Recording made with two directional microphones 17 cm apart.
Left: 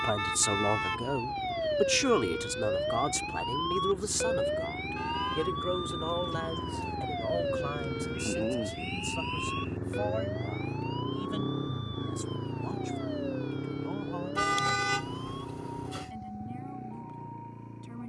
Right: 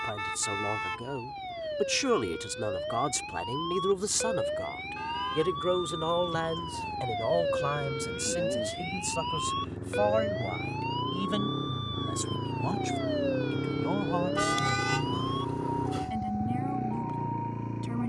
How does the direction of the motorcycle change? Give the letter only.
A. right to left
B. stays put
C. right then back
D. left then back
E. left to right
E.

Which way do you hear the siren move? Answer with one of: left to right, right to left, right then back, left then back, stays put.
left to right.